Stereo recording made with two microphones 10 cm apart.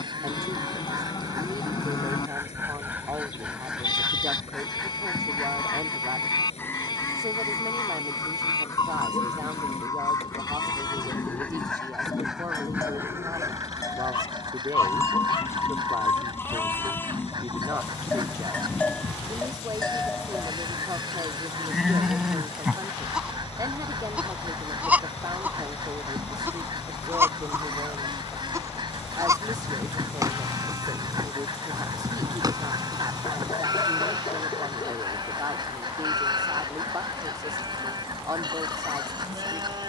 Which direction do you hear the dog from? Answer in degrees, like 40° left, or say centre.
50° left.